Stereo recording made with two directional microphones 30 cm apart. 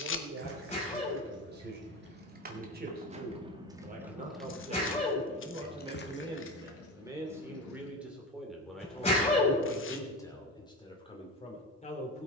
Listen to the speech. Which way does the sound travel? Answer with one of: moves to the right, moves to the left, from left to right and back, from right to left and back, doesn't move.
moves to the left.